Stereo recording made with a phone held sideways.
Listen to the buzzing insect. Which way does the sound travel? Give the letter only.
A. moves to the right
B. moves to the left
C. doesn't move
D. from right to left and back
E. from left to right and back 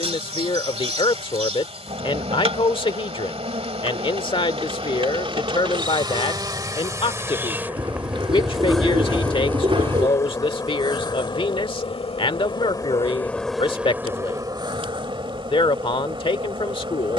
D.